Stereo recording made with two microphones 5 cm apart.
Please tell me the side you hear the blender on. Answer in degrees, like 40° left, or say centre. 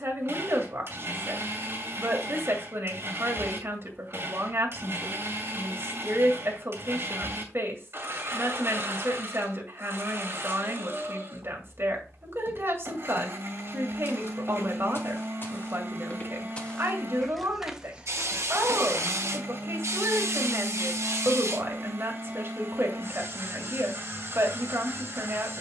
50° right.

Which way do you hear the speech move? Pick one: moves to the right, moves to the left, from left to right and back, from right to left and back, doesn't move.
doesn't move.